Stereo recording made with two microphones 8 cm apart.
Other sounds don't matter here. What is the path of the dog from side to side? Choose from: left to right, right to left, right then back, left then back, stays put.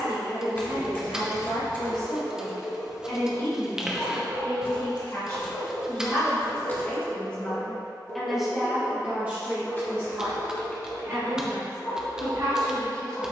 stays put.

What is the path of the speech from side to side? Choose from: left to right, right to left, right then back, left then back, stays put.
left to right.